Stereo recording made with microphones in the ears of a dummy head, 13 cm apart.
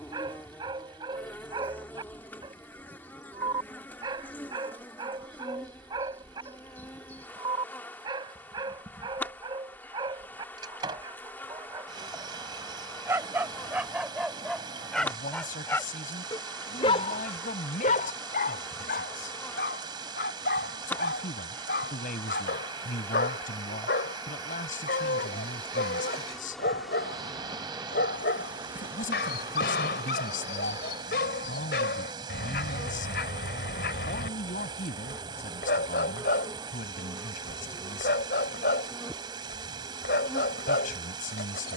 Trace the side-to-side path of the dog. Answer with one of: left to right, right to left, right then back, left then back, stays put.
right to left.